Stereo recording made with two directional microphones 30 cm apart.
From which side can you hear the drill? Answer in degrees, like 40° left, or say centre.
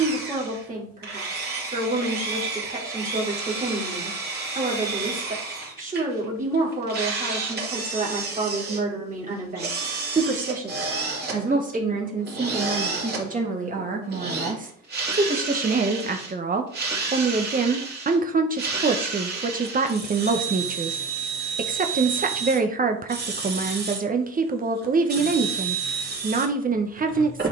30° right.